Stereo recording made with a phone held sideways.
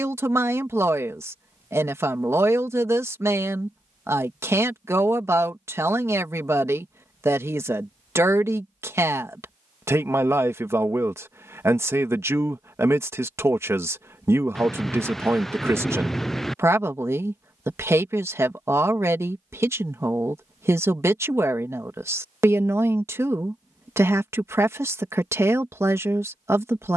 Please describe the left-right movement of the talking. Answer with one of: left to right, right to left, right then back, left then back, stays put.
stays put.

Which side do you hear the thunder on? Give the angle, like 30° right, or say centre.
centre.